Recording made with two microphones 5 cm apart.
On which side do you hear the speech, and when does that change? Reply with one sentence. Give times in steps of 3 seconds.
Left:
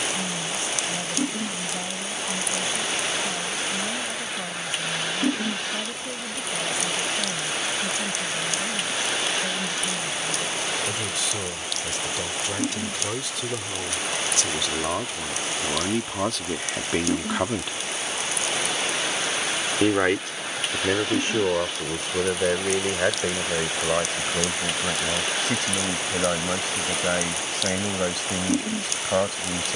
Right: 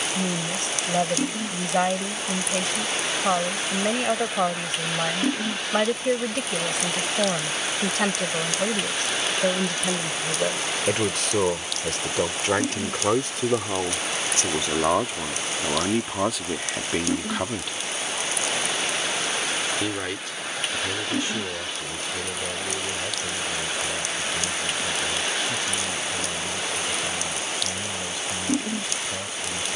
In this clip you hear the speech on the right from 0 s, in the centre from 15 s and on the left from 18 s.